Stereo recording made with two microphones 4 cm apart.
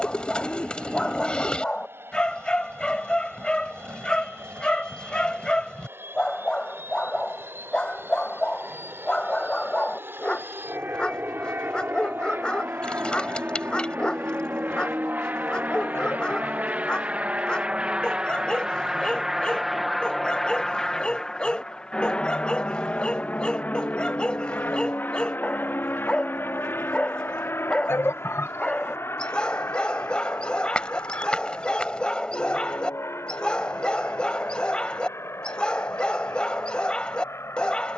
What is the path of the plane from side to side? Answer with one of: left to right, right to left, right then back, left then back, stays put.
right to left.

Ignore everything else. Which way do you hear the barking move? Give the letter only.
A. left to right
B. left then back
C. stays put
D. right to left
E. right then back
C.